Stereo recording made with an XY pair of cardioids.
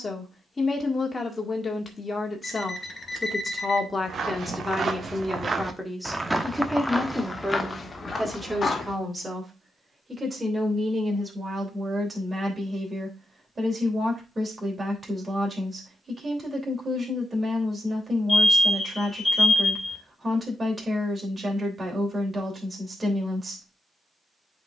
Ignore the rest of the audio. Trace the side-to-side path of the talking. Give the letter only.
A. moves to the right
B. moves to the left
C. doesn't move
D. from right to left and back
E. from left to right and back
A.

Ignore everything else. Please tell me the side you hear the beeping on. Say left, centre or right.
left.